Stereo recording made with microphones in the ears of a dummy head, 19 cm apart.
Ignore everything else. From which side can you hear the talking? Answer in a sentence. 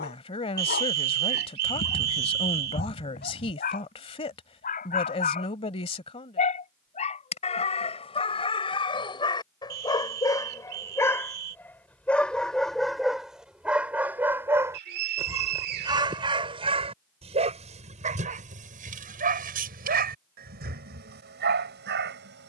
You can hear the talking on the left.